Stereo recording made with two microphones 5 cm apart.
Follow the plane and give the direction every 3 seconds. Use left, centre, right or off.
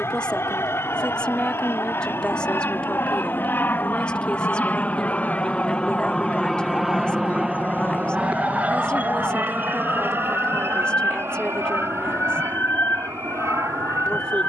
left, left, centre, right, right.